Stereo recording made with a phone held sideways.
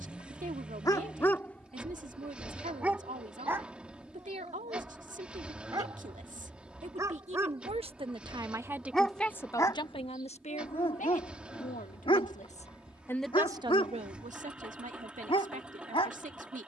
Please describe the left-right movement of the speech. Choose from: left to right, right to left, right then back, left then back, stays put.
left then back.